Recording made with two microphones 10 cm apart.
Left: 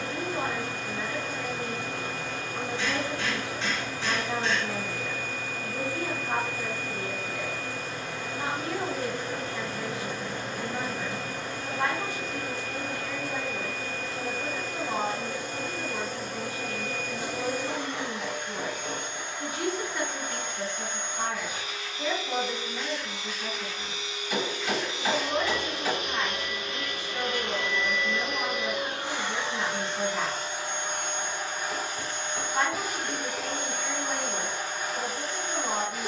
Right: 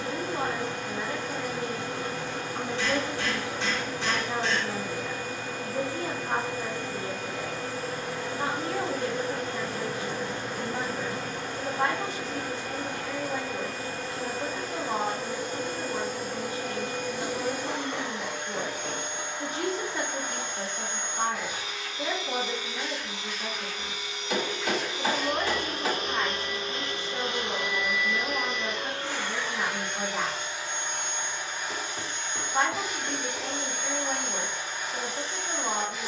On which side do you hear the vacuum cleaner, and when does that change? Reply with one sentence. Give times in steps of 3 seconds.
You can hear the vacuum cleaner on the right from 0 s, in the centre from 27 s and on the left from 30 s.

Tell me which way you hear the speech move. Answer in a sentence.
In this clip you hear the speech stay put.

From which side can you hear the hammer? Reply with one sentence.
You can hear the hammer on the right.